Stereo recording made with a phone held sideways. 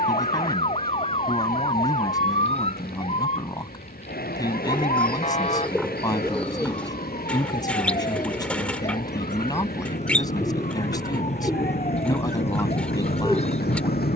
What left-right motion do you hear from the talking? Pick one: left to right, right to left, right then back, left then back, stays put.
stays put.